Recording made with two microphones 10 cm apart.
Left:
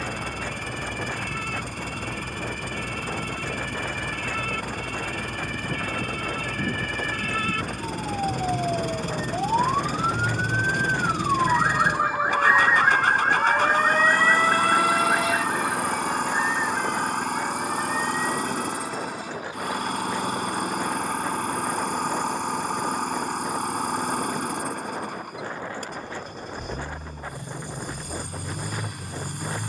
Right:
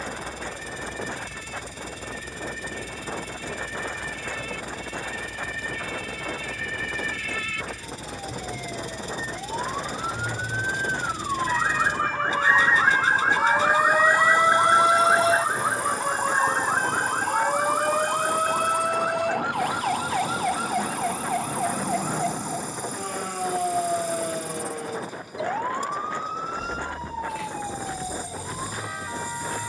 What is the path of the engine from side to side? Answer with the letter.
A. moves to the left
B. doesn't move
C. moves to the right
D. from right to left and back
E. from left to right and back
B.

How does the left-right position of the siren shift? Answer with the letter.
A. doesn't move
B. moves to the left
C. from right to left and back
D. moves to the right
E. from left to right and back
D.